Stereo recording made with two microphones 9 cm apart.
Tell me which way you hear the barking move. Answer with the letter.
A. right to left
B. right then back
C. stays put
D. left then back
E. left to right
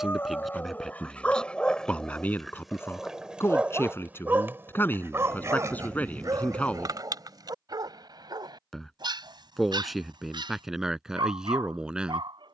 E.